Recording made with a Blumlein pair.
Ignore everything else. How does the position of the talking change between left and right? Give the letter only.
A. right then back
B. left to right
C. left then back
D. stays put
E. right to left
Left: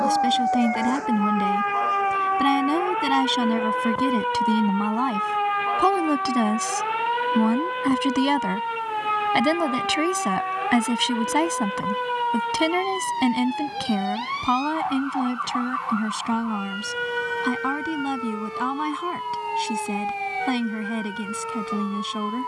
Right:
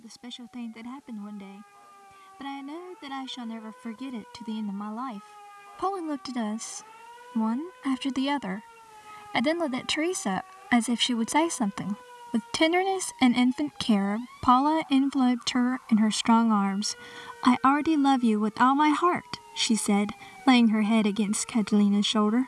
B.